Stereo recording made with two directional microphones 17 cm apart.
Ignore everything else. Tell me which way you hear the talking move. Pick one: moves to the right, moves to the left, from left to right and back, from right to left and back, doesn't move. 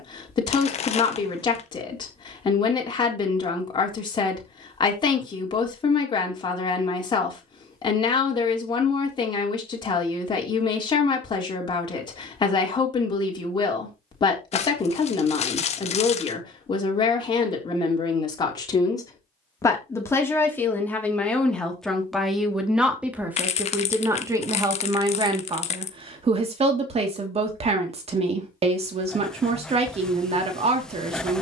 moves to the right.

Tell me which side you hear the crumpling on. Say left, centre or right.
left.